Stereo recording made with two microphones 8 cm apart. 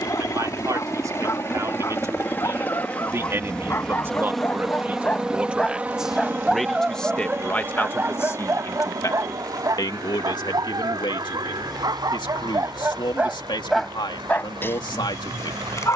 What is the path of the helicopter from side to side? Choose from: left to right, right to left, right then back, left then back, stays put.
left to right.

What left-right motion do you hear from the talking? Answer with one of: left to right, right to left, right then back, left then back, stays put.
right to left.